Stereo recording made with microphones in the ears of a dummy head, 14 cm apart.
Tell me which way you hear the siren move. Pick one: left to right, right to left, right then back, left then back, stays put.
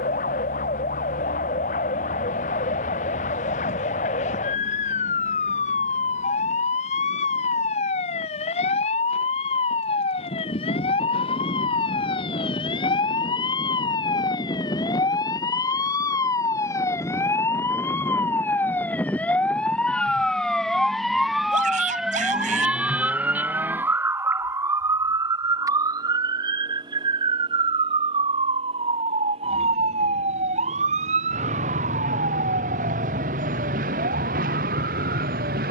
left to right.